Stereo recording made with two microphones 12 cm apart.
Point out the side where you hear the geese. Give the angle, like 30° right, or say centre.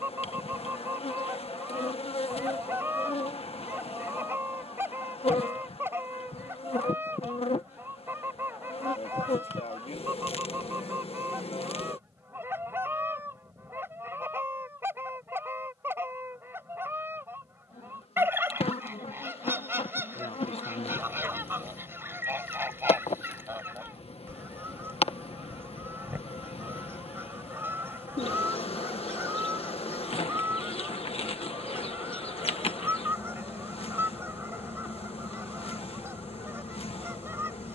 20° right.